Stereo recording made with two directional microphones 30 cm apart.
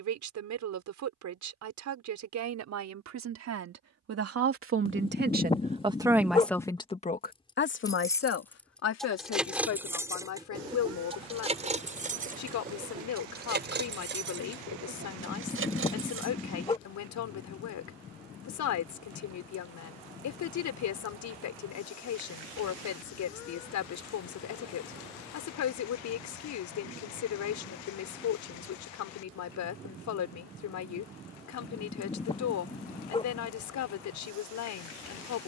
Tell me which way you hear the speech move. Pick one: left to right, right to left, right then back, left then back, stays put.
right to left.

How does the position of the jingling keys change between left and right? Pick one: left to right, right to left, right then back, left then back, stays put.
left to right.